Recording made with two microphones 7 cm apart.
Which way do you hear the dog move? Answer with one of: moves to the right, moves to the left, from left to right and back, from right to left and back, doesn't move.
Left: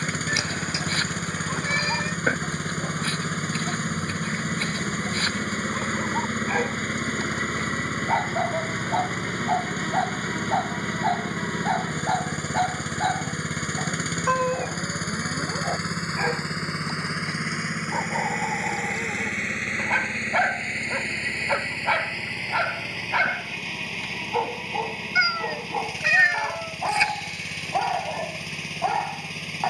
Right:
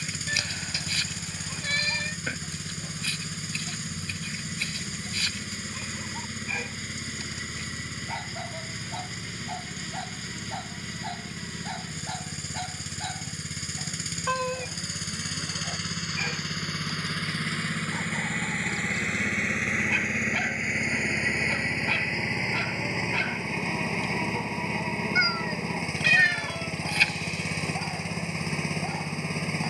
doesn't move.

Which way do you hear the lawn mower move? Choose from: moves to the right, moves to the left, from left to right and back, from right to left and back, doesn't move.
moves to the right.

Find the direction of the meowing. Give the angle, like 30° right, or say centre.
20° left.